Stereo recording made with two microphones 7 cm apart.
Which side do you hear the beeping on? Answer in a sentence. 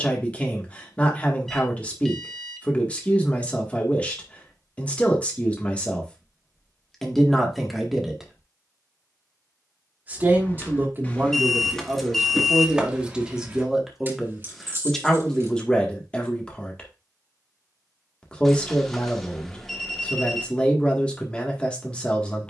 You can hear the beeping in the centre.